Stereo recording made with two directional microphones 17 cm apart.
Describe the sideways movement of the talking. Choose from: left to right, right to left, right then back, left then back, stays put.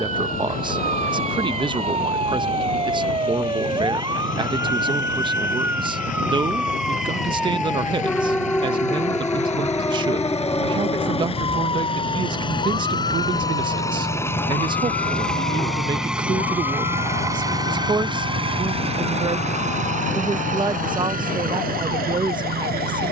stays put.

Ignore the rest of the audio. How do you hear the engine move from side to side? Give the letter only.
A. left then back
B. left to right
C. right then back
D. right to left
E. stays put
B.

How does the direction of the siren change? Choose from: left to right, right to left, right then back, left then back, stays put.
right to left.